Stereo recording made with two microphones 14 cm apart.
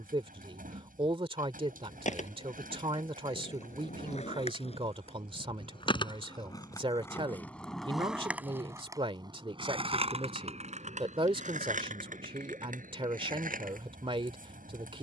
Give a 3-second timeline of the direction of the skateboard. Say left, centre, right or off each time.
left, left, centre, right, right.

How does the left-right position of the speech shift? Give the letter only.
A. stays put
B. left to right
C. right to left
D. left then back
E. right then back
A.